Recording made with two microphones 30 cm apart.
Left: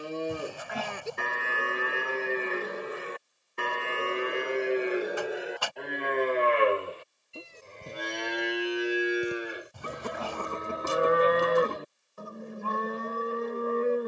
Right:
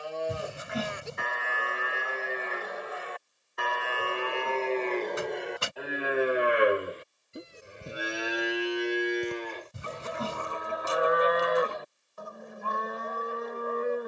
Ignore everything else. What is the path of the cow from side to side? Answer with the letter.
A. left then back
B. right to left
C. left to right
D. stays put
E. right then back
E.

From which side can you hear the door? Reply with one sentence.
You can hear the door on the right.